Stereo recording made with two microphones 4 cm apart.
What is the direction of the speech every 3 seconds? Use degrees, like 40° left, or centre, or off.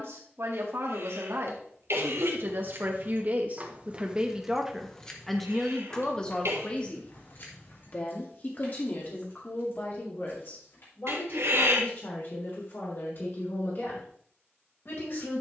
60° right, 20° right, 30° left, 50° left, 60° left.